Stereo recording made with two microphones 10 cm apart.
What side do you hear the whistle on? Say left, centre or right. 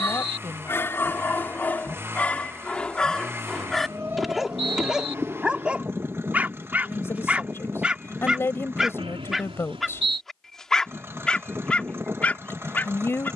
right.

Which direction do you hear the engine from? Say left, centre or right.
right.